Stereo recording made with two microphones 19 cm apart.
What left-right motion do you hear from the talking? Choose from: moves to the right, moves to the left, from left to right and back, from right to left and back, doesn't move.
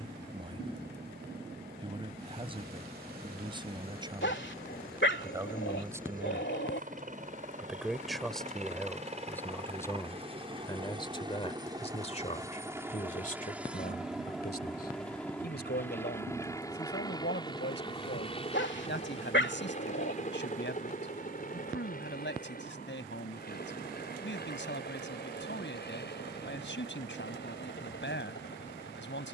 moves to the left.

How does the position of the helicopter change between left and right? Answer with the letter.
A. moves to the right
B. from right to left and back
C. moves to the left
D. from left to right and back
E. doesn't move
C.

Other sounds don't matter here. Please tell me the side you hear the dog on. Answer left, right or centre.
left.